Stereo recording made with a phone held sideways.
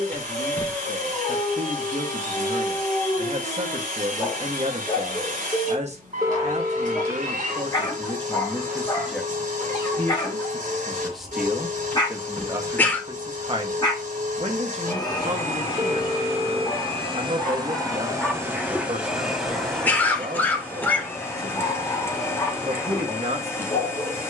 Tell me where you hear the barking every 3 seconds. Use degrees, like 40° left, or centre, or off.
30° left, 30° left, 30° left, 30° left, 30° left, 20° left, centre, 20° left.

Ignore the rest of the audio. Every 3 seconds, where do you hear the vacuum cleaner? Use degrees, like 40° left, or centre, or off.
60° right, 60° right, 60° right, 60° right, 60° right, 40° right, centre, 20° left.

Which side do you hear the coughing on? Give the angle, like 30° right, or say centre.
10° left.